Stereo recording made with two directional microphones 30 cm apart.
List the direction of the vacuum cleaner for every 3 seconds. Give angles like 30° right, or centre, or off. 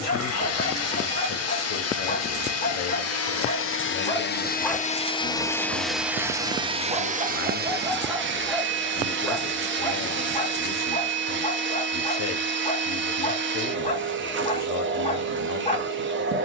50° left, 30° left, 30° right, 40° right, 40° right, 40° right.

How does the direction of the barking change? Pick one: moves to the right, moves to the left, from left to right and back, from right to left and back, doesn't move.
from left to right and back.